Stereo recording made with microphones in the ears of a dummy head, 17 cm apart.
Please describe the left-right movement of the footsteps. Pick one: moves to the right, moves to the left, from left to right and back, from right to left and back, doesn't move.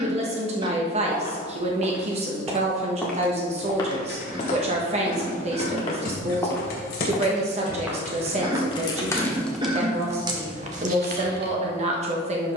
from right to left and back.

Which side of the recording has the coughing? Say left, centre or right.
right.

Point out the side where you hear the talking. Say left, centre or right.
right.